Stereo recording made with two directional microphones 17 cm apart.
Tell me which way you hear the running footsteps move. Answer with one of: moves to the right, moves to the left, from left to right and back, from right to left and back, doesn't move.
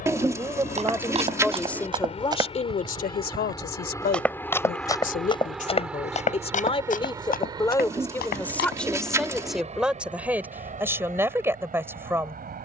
moves to the left.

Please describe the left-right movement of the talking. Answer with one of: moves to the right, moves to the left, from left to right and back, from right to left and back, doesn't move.
from right to left and back.